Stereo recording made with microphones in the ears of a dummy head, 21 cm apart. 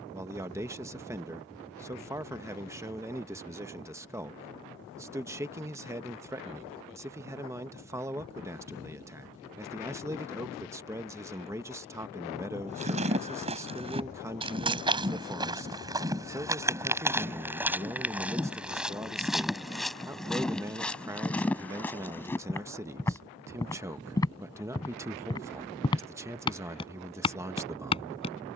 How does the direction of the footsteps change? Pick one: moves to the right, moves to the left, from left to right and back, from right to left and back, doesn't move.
moves to the left.